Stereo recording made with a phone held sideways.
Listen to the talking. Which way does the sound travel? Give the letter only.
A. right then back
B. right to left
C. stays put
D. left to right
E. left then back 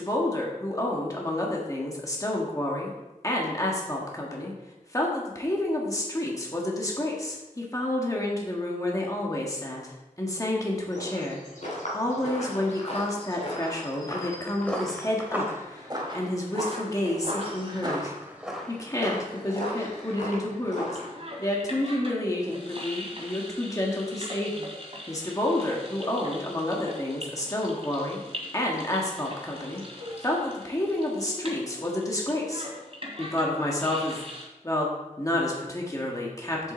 C.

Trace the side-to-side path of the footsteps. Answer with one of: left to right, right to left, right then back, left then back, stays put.
right then back.